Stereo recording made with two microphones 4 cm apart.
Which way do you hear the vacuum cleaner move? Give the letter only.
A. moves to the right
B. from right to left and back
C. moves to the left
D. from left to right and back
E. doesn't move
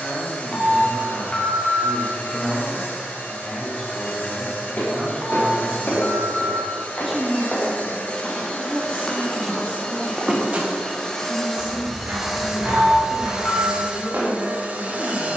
A.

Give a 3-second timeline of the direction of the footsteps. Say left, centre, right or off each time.
off, left, left, right, right.